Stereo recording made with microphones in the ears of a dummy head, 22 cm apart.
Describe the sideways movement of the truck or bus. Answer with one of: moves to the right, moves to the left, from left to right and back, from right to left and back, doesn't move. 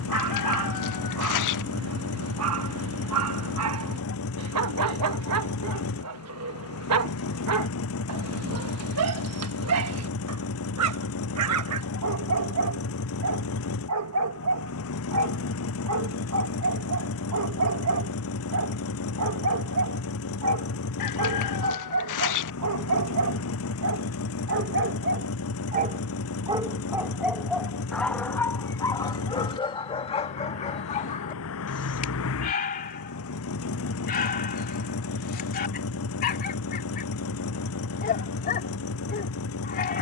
doesn't move.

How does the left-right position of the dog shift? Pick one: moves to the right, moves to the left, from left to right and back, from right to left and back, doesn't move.
moves to the left.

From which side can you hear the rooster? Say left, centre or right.
left.